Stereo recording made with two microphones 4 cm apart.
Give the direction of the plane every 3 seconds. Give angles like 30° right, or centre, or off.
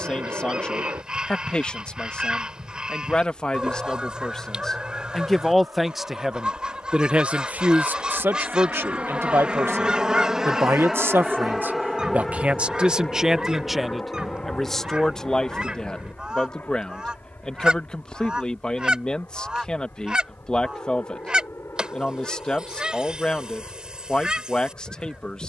70° right, 60° right, 40° right, 10° right, 20° left, 40° left, 50° left, 60° left, 60° left.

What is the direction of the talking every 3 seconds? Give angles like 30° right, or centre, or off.
20° left, 10° left, 40° right, 60° right, 10° right, 20° left, 20° left, 20° left, 20° left.